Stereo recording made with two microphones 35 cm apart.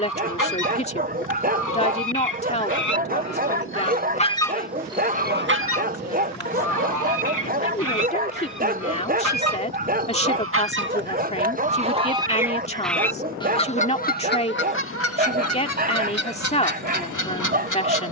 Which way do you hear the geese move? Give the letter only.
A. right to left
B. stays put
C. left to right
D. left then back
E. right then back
E.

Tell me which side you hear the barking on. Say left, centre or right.
right.